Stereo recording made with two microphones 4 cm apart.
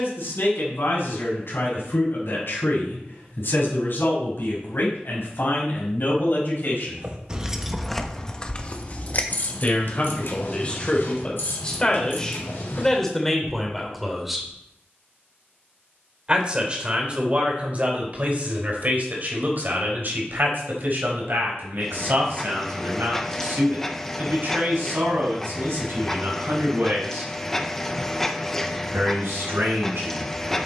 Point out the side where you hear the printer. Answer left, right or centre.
centre.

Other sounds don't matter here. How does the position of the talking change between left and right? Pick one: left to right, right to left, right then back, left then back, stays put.
left to right.